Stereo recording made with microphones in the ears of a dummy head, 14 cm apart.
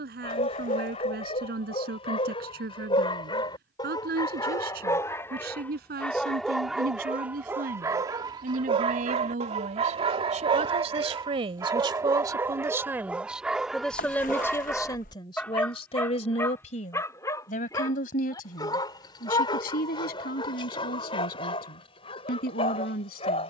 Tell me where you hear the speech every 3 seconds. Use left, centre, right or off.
right, right, right, right, centre, left, left, left.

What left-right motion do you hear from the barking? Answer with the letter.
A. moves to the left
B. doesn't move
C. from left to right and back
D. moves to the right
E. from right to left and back
C.